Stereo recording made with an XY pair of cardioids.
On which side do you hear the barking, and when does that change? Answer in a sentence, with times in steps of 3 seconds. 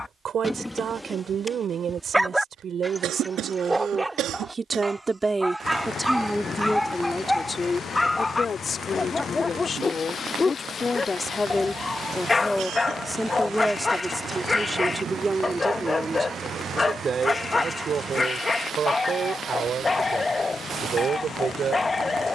You can hear the barking in the centre from 0 s and on the left from 9 s.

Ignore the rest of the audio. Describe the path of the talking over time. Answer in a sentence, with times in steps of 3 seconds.
In this clip you hear the talking on the right from 0 s, on the left from 6 s, in the centre from 12 s and on the right from 15 s.